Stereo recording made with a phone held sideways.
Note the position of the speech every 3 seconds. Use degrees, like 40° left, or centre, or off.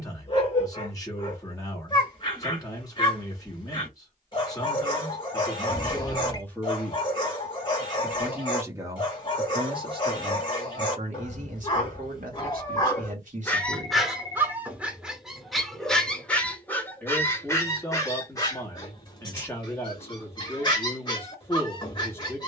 20° left, 20° left, centre, 40° right, 50° right, 10° left, 10° left, 10° left.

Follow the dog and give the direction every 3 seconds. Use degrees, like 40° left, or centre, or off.
30° left, 30° left, 30° left, 30° left, 10° left, 10° left, 30° left, 30° left.